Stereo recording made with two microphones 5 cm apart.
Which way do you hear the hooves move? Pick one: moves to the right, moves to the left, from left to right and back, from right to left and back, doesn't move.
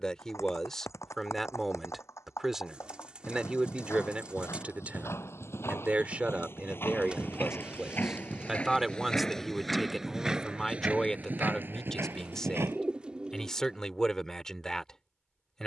moves to the right.